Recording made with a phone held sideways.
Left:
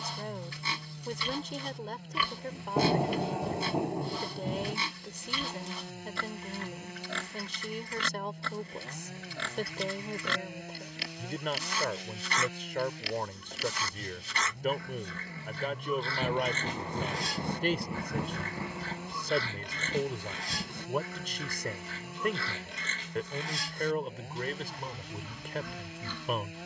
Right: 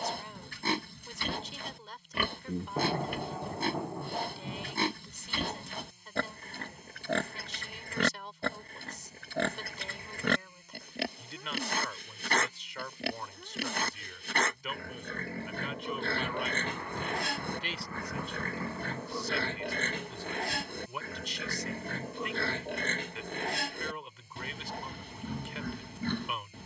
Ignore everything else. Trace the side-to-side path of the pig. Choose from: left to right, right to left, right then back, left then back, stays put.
stays put.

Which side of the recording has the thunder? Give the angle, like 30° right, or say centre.
20° left.